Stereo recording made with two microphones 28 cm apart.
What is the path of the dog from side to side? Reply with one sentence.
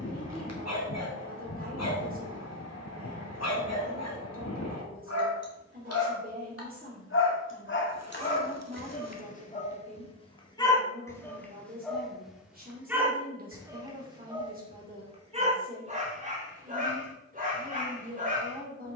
In this clip you hear the dog move to the right.